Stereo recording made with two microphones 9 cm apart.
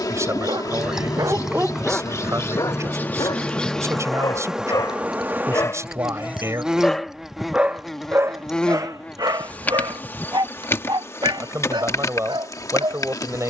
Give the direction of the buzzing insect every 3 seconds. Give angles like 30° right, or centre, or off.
40° left, centre, centre, 20° left, 40° left.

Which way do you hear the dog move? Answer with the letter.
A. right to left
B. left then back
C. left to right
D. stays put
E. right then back
B.